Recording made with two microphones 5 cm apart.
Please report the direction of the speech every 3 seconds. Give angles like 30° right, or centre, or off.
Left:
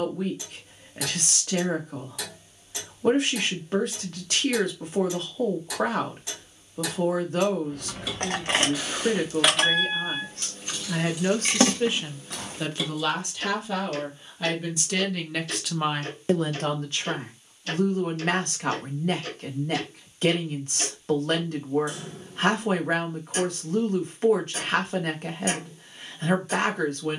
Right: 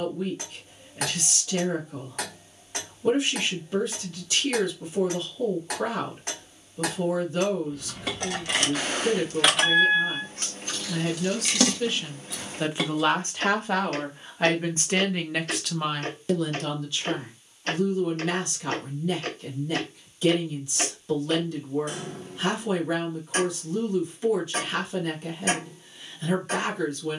60° left, 60° left, 60° left, 50° left, 30° right, 20° left, 50° left, 50° left, 50° left.